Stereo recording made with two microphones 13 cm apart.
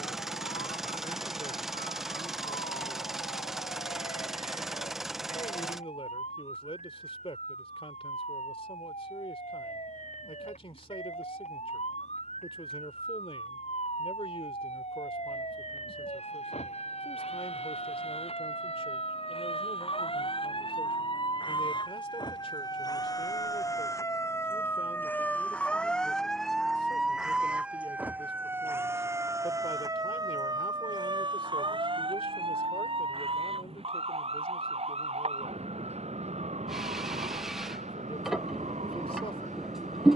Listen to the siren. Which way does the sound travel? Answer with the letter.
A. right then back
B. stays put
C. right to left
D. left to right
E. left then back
D.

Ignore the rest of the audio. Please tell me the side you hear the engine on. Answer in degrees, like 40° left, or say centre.
centre.